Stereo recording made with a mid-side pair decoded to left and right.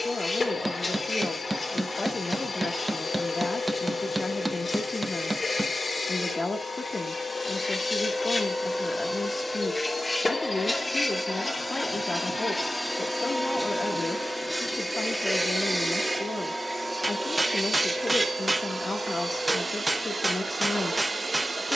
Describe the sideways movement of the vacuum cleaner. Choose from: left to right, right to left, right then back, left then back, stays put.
left to right.